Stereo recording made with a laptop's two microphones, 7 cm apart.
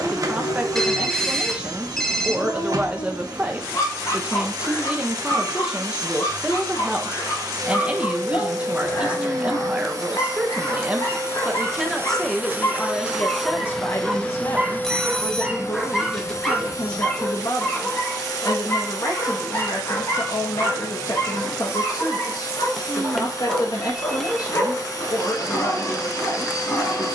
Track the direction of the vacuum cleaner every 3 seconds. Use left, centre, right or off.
right, right, right, right, centre, left, left, left, left.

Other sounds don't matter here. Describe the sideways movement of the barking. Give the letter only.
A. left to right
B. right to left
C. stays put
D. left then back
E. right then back
E.